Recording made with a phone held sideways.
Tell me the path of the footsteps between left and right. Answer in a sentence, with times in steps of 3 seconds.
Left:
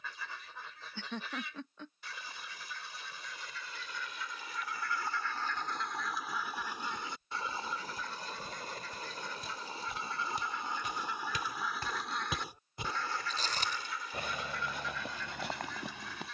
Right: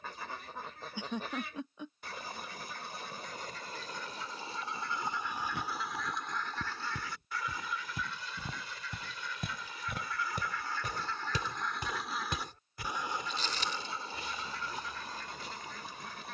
You can hear the footsteps not at all from 0 s, on the right from 3 s and on the left from 12 s.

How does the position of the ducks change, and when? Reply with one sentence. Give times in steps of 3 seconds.
In this clip you hear the ducks on the right from 0 s, on the left from 6 s and on the right from 12 s.